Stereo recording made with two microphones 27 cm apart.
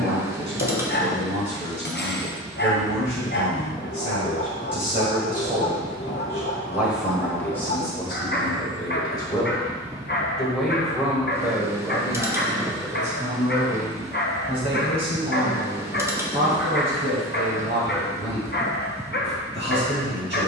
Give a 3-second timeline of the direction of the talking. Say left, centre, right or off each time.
right, right, centre, centre, right, right, right.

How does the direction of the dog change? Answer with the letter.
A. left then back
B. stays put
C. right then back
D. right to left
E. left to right
B.